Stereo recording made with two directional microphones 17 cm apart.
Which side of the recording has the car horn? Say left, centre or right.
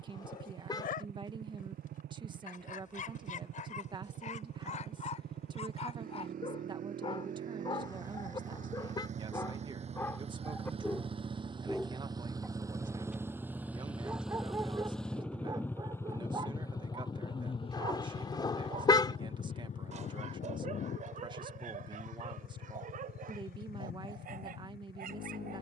left.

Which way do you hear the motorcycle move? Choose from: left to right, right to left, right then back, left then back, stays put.
right to left.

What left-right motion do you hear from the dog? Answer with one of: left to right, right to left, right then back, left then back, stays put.
left to right.